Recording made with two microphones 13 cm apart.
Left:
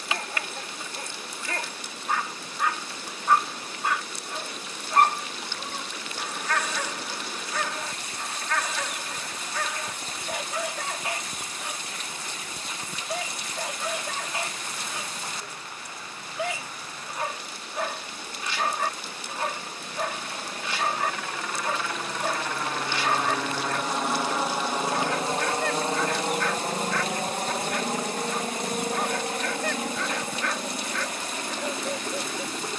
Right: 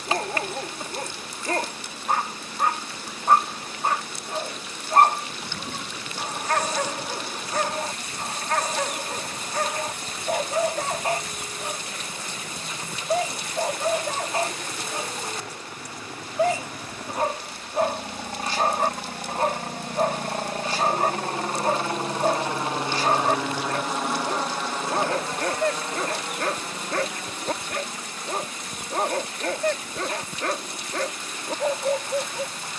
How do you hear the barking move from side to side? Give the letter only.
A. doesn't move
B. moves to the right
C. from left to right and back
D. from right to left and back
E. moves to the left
A.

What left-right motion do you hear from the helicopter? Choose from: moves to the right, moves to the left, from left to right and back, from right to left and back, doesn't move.
moves to the left.